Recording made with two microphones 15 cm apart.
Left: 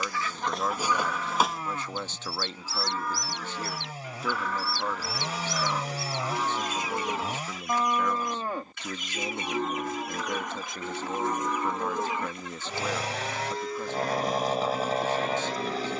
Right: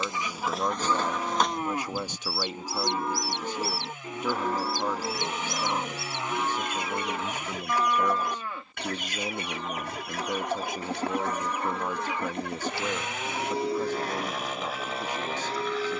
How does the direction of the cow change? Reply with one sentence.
In this clip you hear the cow go left and come back.